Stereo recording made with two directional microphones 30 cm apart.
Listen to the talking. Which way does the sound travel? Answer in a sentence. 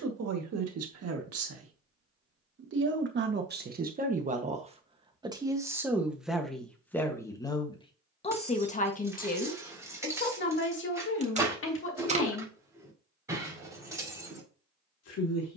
In this clip you hear the talking move from right to left.